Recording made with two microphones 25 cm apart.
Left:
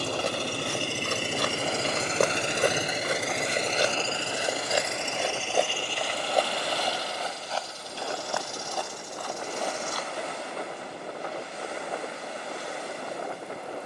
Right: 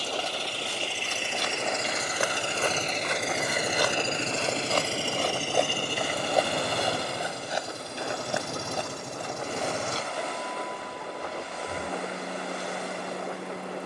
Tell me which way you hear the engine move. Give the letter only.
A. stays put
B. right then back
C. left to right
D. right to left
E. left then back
C.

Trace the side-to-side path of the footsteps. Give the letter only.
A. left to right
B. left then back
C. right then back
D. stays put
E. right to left
A.